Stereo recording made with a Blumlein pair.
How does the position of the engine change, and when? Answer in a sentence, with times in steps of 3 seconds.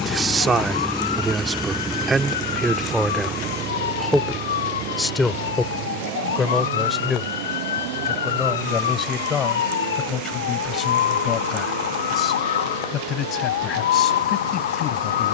In this clip you hear the engine in the centre from 0 s and on the right from 3 s.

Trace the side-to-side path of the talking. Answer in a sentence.
You can hear the talking move to the left.